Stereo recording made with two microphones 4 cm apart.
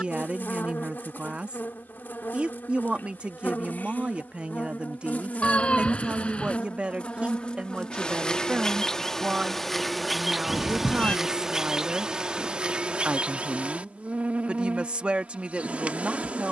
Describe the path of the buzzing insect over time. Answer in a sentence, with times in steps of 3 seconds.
You can hear the buzzing insect on the left from 0 s, in the centre from 9 s and on the right from 12 s.